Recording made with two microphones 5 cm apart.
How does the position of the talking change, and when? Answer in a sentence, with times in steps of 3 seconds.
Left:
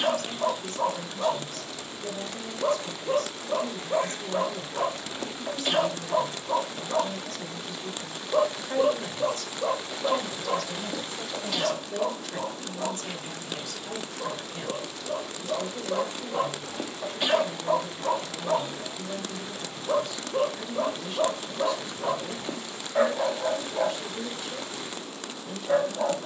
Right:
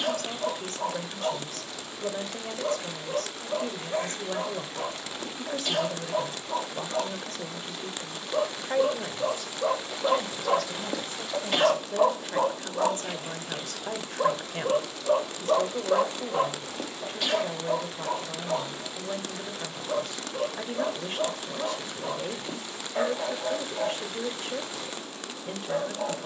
In this clip you hear the talking on the right from 0 s, in the centre from 9 s and on the right from 12 s.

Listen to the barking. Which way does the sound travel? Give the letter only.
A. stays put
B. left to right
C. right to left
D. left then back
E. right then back
E.